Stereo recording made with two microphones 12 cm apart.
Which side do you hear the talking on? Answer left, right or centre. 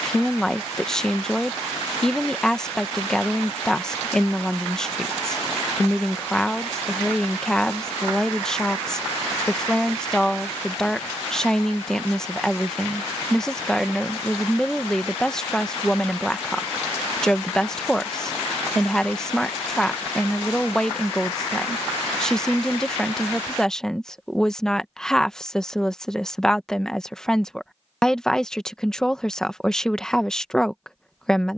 centre.